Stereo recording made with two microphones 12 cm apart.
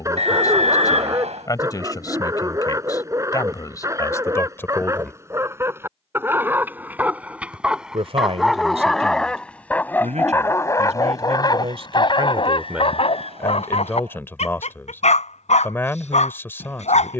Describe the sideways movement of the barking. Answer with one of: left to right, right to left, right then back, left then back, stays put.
right to left.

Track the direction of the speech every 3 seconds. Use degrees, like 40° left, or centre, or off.
30° left, 20° left, 60° right, 70° right, centre, 20° left.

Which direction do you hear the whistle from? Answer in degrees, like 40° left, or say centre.
70° right.